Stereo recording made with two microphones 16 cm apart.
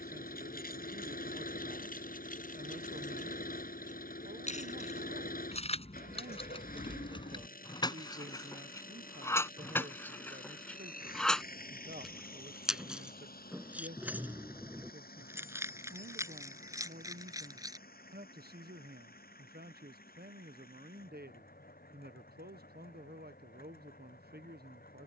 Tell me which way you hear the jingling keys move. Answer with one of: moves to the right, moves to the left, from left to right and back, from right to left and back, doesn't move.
moves to the right.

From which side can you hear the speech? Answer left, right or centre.
right.